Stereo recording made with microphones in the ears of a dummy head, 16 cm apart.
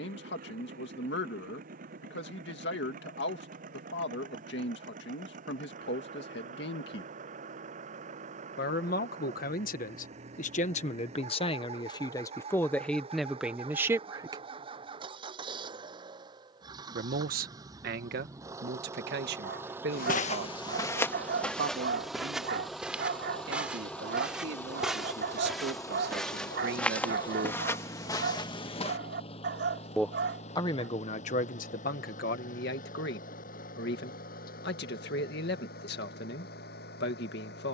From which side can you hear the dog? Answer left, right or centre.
right.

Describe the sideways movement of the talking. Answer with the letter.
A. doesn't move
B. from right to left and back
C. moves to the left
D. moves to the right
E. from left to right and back
E.